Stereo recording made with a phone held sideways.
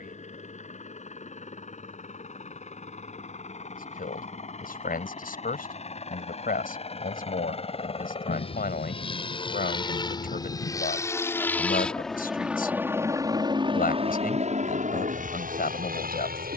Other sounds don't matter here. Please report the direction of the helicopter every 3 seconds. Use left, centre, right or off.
left, left, left, left, right, right.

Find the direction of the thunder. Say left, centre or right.
left.